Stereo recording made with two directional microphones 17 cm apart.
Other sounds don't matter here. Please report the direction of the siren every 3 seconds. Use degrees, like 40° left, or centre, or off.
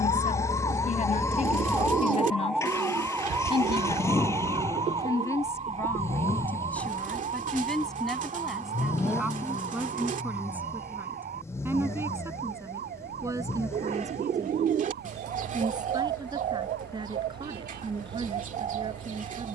10° left, 20° right, 40° right, 50° right, 60° right, 60° right, 60° right.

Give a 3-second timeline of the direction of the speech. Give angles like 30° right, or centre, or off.
40° left, 20° left, centre, 10° right, 20° right, 20° right, 30° right.